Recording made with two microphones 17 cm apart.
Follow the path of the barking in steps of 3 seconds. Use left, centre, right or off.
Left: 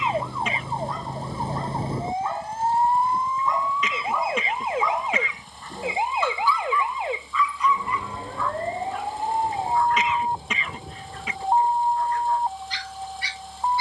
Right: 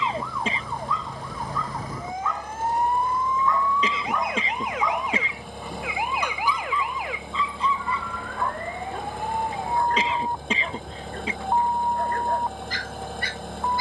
left, centre, right, right, right.